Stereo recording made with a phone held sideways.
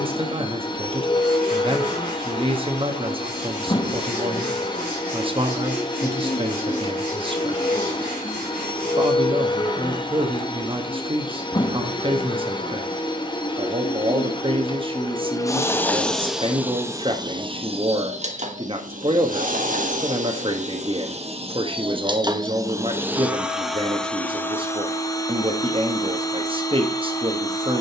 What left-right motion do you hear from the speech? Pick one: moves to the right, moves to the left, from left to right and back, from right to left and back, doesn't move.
doesn't move.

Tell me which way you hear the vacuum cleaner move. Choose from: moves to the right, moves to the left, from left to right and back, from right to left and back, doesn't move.
from left to right and back.